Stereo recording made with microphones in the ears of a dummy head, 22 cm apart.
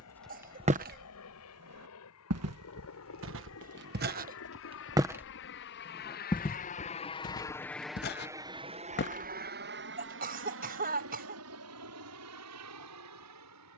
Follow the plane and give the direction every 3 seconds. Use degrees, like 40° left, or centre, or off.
80° left, 60° left, 10° left, 50° right, 70° right.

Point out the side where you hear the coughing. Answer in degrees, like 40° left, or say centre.
40° right.